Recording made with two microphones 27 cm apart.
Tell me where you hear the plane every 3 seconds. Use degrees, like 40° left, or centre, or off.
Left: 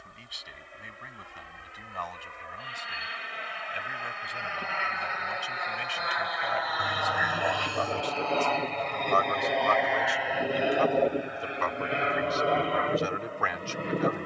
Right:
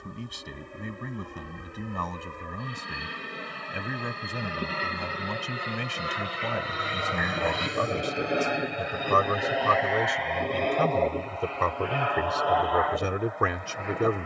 60° right, 50° right, 20° right, 10° left, 30° left.